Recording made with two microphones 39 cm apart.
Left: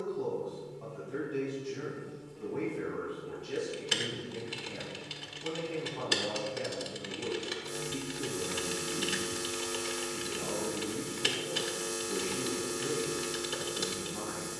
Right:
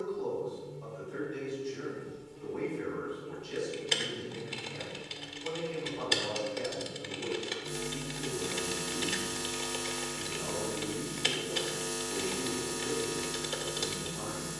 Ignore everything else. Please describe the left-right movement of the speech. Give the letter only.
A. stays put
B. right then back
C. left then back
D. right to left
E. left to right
A.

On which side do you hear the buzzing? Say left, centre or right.
right.